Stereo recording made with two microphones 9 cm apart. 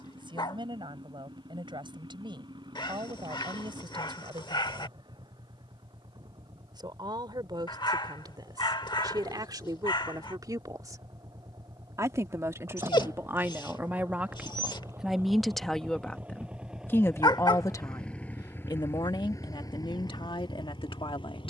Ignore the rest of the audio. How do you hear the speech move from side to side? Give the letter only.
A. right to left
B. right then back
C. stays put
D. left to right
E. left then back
A.